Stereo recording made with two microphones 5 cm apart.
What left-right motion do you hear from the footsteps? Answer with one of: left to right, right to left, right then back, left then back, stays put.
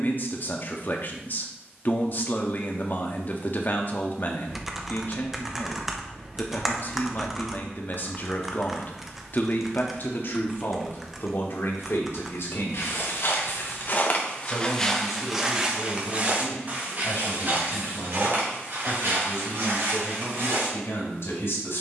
left to right.